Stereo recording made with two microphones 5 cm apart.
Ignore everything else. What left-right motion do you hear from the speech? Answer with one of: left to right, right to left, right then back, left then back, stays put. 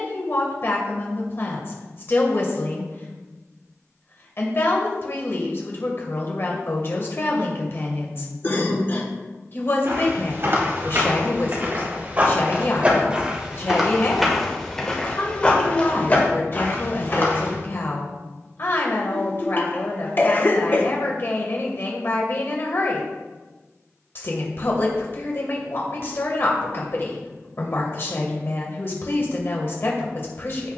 stays put.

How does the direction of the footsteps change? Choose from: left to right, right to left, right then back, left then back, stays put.
right to left.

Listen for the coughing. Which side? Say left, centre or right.
left.